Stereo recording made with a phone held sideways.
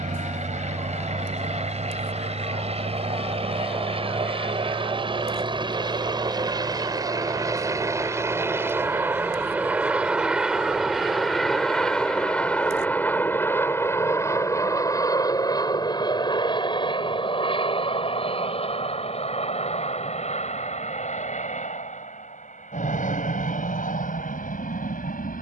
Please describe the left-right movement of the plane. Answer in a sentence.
You can hear the plane move to the left.